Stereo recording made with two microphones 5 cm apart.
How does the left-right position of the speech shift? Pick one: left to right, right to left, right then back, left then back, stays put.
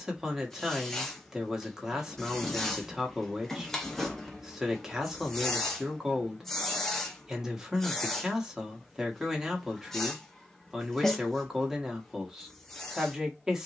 stays put.